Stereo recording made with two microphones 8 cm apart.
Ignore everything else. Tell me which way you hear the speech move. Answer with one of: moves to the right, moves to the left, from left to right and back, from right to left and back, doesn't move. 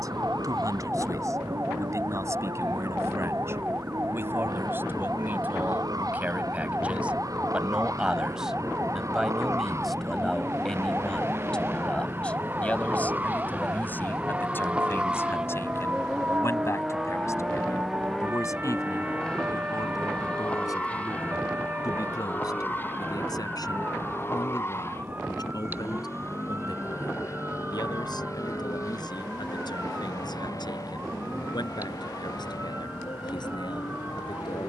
moves to the left.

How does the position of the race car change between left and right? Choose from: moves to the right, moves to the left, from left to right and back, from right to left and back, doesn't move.
moves to the left.